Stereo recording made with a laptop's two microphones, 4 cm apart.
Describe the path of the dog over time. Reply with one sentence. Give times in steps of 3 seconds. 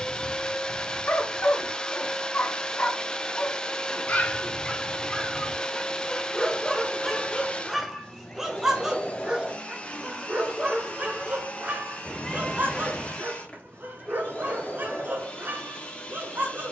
You can hear the dog on the left from 0 s, in the centre from 6 s and on the right from 9 s.